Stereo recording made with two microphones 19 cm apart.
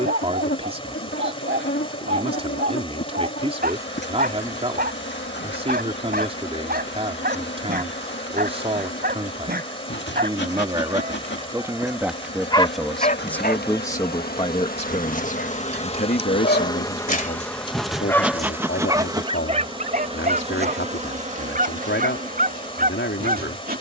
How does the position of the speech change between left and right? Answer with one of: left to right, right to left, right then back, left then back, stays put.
right to left.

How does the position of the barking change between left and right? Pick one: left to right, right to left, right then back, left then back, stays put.
left then back.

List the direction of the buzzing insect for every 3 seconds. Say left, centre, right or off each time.
left, left, left, left, left, left, right, right.